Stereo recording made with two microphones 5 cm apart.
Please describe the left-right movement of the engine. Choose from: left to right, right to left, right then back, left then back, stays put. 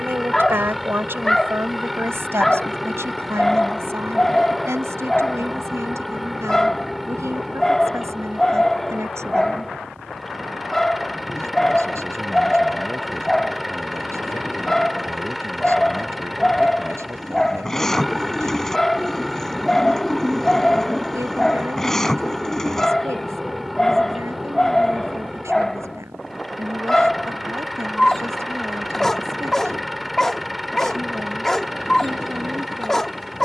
stays put.